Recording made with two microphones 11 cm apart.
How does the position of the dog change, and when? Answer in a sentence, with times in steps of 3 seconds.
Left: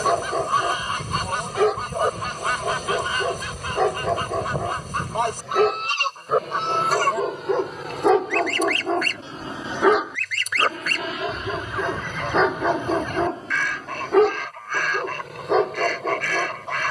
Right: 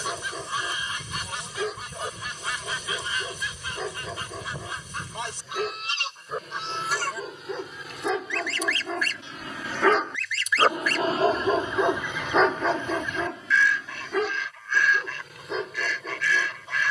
You can hear the dog on the left from 0 s, in the centre from 9 s and on the left from 12 s.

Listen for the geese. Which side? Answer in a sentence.
In this clip you hear the geese on the left.